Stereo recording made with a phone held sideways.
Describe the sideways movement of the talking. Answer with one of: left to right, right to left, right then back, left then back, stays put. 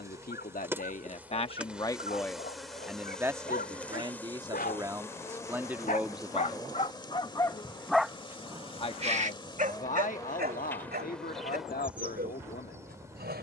right then back.